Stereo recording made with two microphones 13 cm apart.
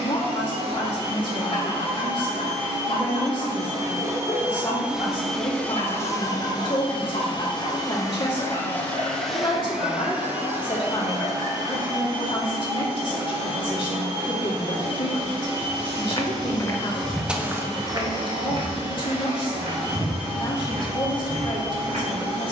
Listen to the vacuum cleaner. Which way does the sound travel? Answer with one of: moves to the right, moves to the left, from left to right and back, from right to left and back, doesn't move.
from right to left and back.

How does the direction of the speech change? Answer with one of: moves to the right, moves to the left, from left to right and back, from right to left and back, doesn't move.
doesn't move.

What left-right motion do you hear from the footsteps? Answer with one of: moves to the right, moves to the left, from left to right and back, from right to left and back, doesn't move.
moves to the right.